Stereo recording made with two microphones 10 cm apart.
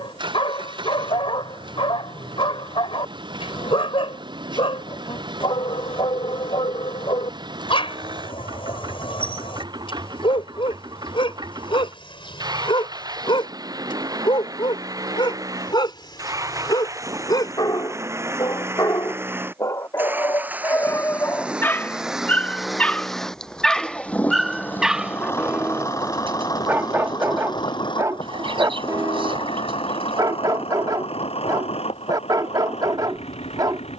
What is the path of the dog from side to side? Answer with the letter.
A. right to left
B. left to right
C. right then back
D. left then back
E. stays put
B.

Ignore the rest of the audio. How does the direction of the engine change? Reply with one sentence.
In this clip you hear the engine move from right to left.